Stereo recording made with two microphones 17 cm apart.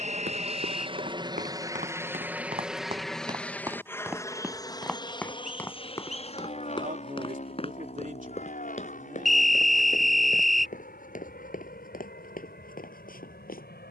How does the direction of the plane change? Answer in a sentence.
In this clip you hear the plane go from the right side to the left.